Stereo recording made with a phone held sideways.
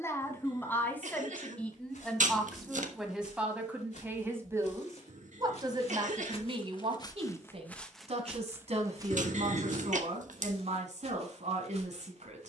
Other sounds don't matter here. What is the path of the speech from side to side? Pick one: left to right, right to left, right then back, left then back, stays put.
left to right.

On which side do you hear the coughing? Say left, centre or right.
right.